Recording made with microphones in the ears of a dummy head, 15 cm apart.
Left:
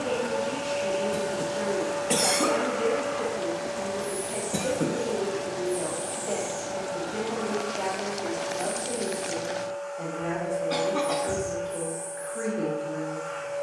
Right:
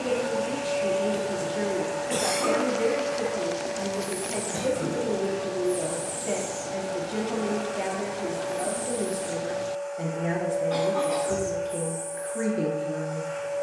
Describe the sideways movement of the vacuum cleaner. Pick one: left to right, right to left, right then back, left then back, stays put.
stays put.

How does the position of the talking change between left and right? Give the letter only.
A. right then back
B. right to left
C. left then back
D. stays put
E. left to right
D.